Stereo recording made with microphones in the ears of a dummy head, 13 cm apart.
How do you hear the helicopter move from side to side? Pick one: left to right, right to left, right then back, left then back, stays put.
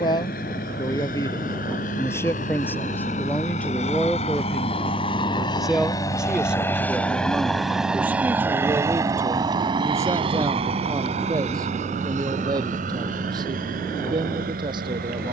left to right.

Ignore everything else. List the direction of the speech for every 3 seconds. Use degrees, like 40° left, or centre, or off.
20° left, 10° left, 10° right, 20° right, 30° right.